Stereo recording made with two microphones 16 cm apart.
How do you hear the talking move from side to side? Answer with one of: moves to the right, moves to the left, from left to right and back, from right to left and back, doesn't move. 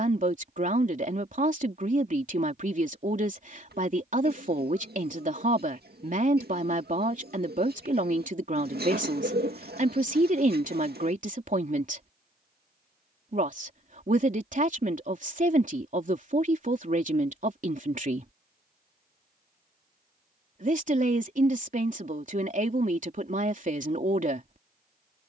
doesn't move.